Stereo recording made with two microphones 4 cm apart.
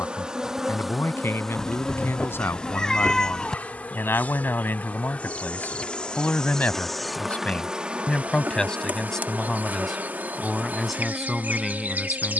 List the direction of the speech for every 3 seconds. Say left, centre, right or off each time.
left, left, left, centre.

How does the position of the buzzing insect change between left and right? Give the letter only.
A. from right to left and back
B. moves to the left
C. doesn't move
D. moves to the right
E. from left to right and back
A.